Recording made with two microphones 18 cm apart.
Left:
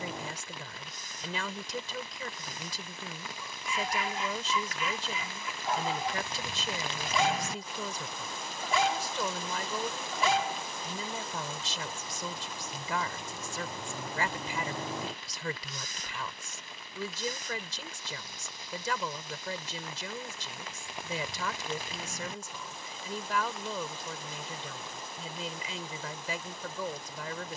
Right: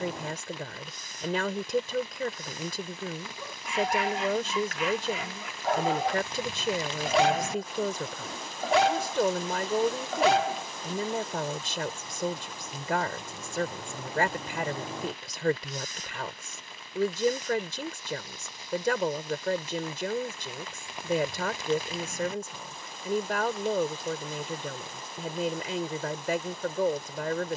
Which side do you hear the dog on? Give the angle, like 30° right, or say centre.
70° right.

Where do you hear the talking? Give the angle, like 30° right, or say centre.
60° right.